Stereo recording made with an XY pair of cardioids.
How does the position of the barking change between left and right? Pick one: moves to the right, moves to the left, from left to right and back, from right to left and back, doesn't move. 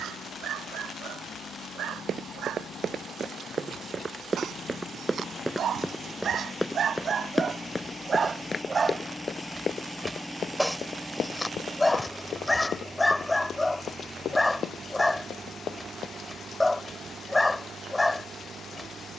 moves to the left.